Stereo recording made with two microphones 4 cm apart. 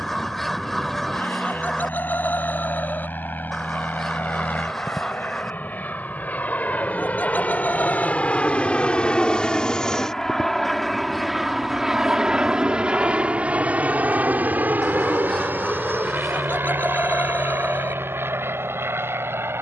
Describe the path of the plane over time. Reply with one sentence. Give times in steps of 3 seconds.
In this clip you hear the plane on the left from 0 s, in the centre from 9 s and on the right from 12 s.